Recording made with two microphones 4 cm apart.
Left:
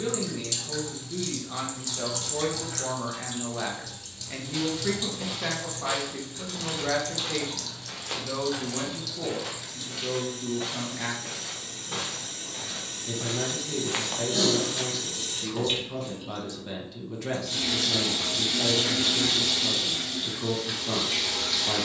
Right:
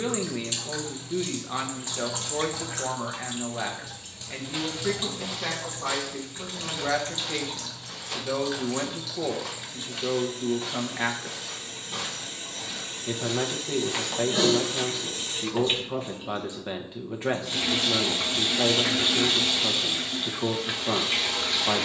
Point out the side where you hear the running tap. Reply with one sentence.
You can hear the running tap on the right.